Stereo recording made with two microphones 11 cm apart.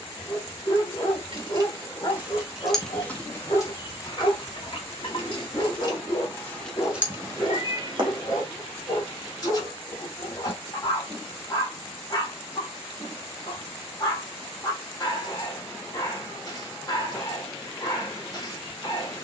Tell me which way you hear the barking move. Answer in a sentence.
In this clip you hear the barking stay in one place.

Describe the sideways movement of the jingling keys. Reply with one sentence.
In this clip you hear the jingling keys move from right to left and back again.